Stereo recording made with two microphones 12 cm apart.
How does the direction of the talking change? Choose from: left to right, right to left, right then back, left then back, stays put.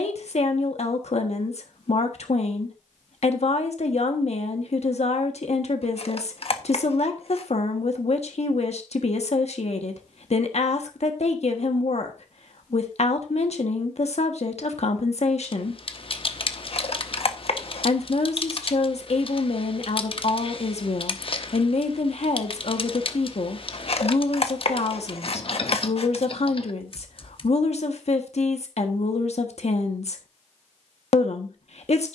stays put.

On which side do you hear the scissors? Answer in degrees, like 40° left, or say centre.
50° left.